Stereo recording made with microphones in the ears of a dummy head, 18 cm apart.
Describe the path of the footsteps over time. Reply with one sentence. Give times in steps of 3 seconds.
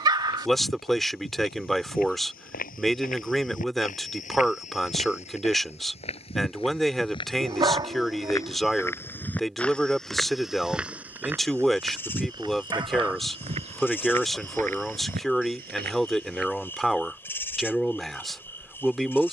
You can hear the footsteps on the left from 0 s, in the centre from 9 s, on the right from 12 s and not at all from 18 s.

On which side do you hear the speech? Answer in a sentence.
You can hear the speech in the centre.